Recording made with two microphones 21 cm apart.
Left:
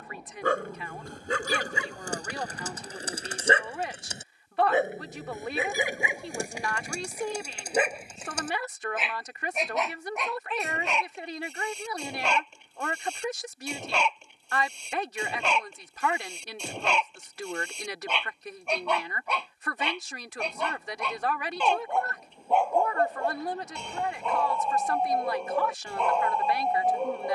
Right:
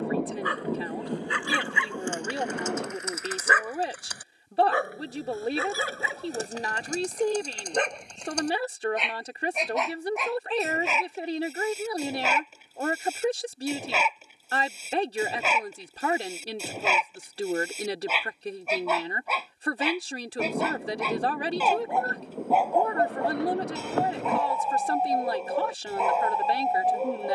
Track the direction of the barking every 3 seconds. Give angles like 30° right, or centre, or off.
40° left, 20° left, 10° left, centre, 10° right, 10° right, 10° right, 10° right, 10° right.